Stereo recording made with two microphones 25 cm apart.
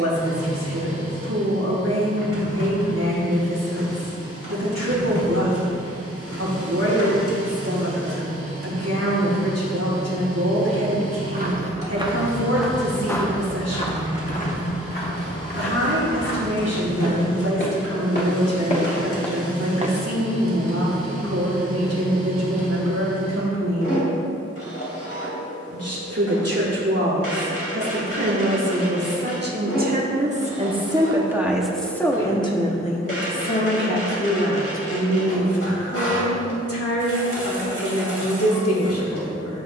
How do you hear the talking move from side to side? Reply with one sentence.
You can hear the talking move from right to left.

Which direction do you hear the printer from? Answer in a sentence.
You can hear the printer on the left.